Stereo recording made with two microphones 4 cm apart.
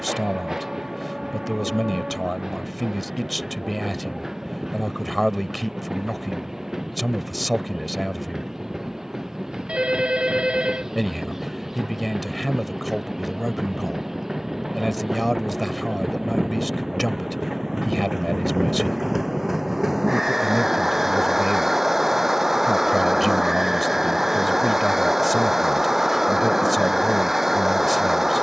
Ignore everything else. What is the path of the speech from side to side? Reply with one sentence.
You can hear the speech stay in one place.